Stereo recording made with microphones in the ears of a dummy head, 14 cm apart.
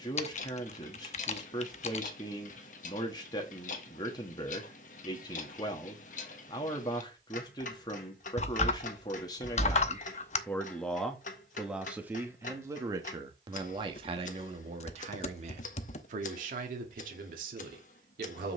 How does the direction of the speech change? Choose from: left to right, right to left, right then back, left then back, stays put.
left to right.